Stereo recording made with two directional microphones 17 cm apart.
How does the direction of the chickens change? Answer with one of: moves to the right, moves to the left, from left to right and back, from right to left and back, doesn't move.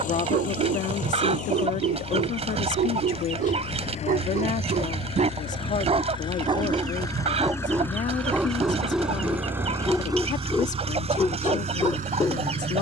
doesn't move.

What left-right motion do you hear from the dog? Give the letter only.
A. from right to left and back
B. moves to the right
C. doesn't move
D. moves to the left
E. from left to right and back
D.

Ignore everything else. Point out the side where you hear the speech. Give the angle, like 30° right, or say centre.
50° left.